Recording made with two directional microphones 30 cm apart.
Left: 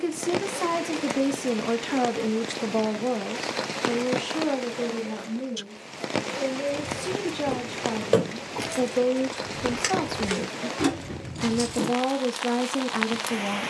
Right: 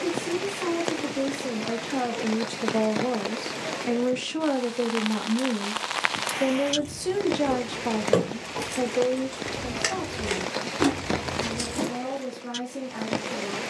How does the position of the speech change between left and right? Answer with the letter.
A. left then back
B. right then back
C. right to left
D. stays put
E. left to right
B.